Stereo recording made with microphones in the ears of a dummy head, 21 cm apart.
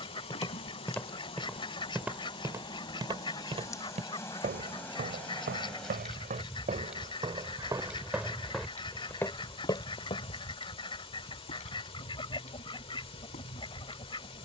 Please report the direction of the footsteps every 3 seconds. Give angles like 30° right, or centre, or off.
centre, 30° right, 20° right, 20° left, off.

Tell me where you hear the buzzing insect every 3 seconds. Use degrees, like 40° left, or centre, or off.
20° left, 10° left, centre, 20° left, 30° left.